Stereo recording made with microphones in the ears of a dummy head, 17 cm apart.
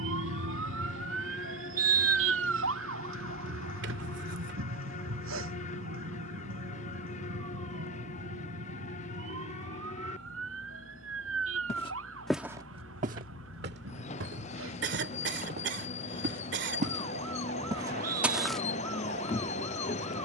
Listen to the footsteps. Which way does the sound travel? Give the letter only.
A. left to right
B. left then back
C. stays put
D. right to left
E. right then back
E.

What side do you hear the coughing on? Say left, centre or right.
right.